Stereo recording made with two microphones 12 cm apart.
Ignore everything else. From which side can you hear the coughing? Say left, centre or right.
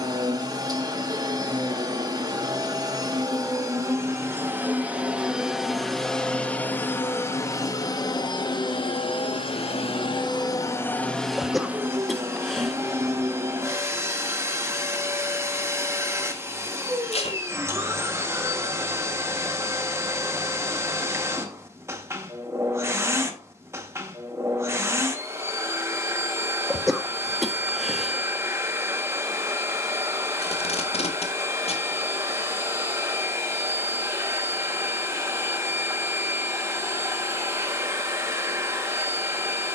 centre.